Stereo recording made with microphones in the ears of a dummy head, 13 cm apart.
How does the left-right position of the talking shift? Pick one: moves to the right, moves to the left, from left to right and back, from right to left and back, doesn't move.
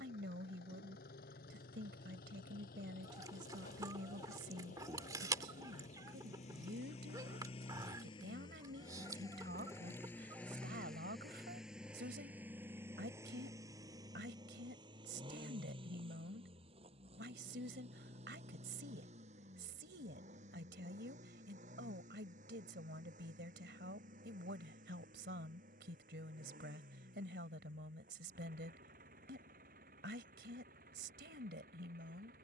doesn't move.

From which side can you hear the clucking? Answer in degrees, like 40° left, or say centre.
20° right.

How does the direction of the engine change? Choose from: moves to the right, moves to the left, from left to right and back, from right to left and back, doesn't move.
moves to the right.